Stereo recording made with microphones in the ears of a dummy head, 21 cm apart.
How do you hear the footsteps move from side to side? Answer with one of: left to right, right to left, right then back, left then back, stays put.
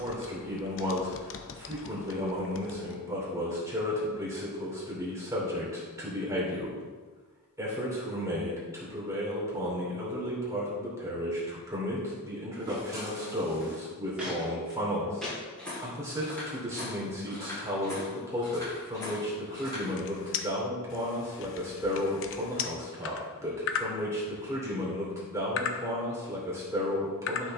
right to left.